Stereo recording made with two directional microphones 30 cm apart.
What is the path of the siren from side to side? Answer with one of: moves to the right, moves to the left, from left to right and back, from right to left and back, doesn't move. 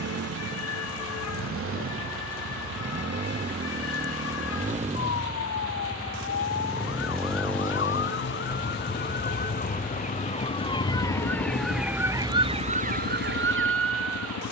moves to the right.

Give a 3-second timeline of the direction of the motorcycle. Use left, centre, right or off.
right, right, centre, left, left.